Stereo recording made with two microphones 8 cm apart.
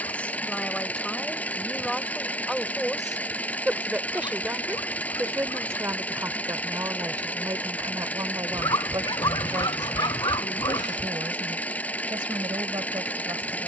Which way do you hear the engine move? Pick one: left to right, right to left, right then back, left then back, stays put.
stays put.